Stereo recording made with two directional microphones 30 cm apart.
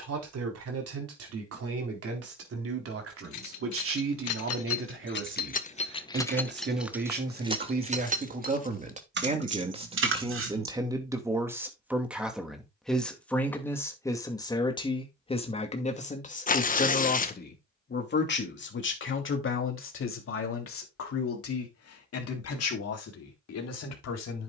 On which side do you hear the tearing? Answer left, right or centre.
left.